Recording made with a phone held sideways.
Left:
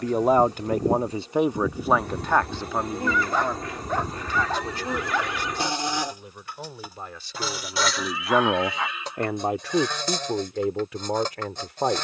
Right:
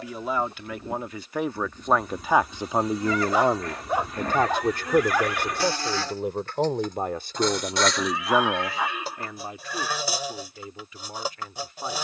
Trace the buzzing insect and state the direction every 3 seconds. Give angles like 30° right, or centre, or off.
70° left, 30° left, centre, 10° right.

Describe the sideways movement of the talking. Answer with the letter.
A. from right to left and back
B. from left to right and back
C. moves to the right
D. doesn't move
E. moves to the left
B.